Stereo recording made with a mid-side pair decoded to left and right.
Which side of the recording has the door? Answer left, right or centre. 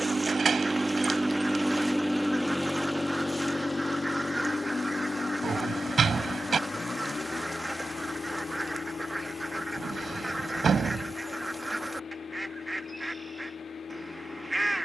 right.